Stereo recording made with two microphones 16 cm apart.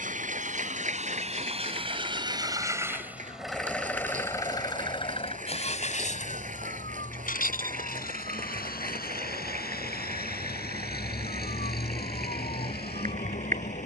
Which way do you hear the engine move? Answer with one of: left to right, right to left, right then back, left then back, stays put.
right to left.